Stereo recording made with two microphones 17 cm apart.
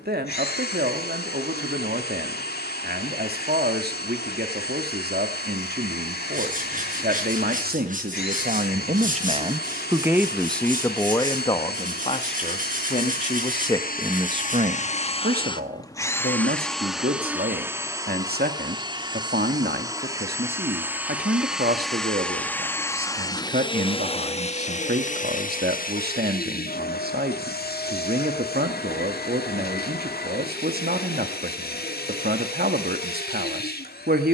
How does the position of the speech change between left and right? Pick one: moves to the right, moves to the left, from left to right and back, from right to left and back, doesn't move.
from right to left and back.